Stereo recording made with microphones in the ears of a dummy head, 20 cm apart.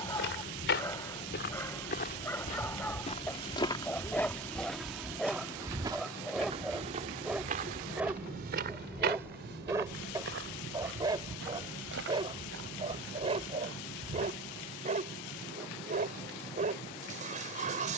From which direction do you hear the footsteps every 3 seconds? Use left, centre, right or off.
left, centre, right, right, right, off.